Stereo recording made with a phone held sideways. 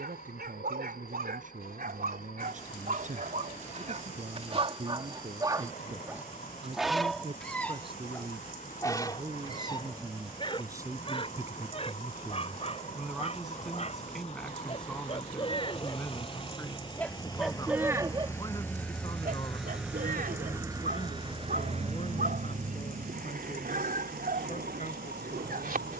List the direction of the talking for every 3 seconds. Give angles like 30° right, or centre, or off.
60° right, 50° right, 40° right, 20° right, centre, 10° left, 30° left, 40° left, 50° left.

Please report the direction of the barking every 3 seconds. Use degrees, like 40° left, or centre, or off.
70° right, 40° right, 10° left, 30° left, 40° left, 20° left, 60° right, 70° right, 70° right.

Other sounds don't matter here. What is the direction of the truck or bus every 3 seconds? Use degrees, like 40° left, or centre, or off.
60° left, 60° left, 60° left, 50° left, 50° left, 30° left, centre, 50° right, 80° right.